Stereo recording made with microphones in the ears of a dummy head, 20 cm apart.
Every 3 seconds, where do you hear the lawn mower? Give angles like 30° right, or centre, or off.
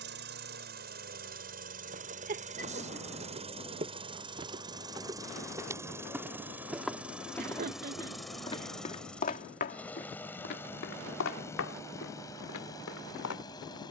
40° right, 20° right, centre, 10° left, 20° left.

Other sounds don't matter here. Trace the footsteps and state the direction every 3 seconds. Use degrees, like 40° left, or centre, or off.
40° right, 20° right, 10° left, 50° left, 70° left.